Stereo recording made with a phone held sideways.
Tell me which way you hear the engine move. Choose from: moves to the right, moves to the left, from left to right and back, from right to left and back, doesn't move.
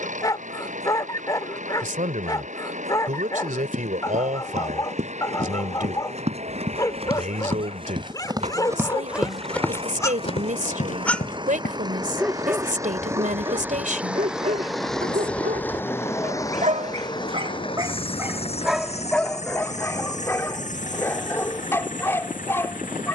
moves to the left.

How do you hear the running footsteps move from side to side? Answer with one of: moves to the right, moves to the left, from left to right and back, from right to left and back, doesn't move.
moves to the left.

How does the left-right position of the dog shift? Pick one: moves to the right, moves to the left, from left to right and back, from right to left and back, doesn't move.
from left to right and back.